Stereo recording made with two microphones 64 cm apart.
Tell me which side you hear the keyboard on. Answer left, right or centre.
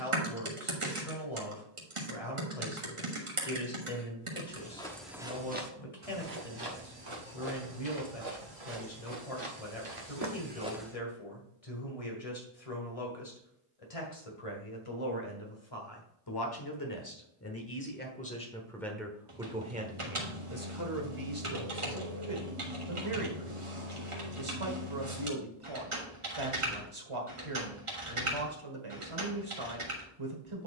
right.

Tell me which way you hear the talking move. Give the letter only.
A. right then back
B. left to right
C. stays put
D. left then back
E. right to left
B.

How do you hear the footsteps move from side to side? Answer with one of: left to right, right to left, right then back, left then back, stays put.
right then back.